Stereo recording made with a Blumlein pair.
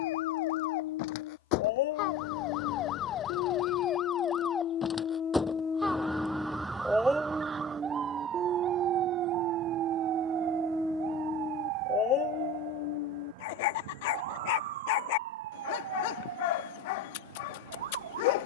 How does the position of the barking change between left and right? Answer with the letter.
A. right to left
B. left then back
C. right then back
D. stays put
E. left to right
C.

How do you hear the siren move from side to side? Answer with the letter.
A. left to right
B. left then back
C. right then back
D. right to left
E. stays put
A.